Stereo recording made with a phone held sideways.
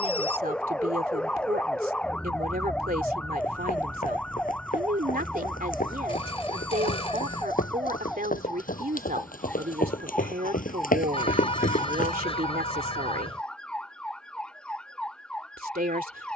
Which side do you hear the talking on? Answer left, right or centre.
right.